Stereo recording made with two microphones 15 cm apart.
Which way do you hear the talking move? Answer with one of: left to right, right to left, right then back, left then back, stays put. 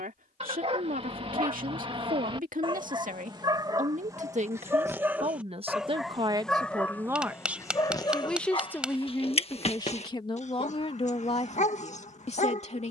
right to left.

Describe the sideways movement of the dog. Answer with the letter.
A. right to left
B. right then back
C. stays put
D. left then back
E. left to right
A.